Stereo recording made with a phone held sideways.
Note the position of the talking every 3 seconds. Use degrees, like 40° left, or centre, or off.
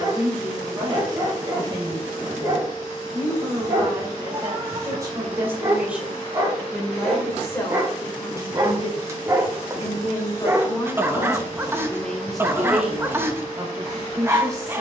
30° right, 20° right, 20° left, 30° left, 10° right.